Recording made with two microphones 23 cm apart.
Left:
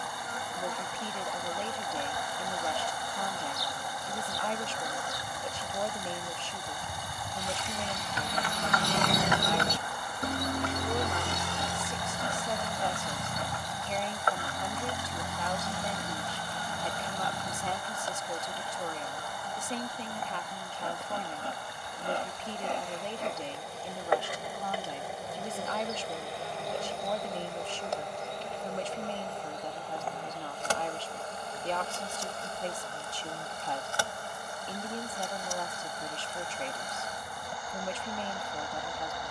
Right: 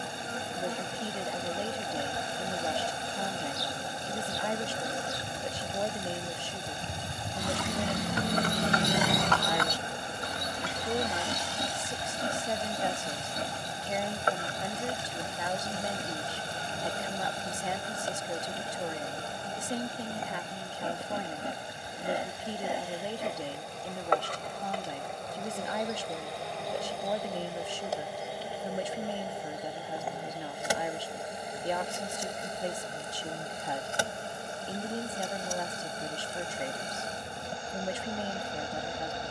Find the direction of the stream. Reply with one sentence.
You can hear the stream on the right.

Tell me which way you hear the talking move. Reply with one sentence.
In this clip you hear the talking stay in one place.